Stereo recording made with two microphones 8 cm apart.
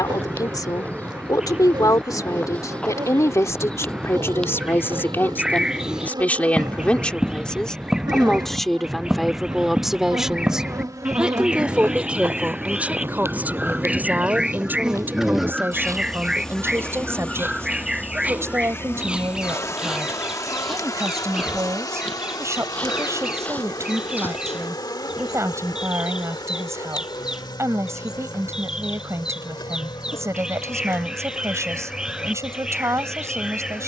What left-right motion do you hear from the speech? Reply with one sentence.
In this clip you hear the speech move to the right.